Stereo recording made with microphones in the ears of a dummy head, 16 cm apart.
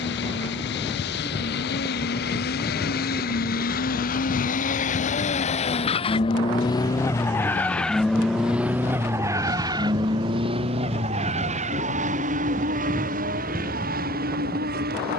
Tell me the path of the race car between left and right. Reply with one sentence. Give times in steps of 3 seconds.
In this clip you hear the race car on the left from 0 s, in the centre from 6 s and on the right from 9 s.